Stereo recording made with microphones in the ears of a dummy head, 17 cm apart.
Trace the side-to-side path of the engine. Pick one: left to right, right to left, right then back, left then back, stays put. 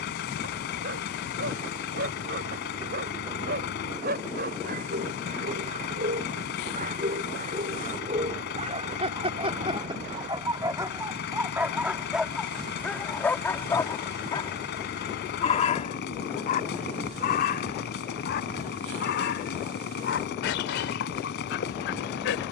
stays put.